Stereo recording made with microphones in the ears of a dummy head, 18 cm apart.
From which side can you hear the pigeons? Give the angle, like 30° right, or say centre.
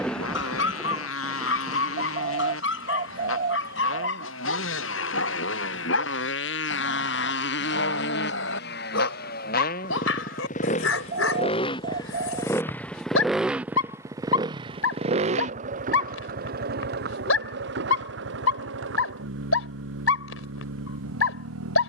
40° right.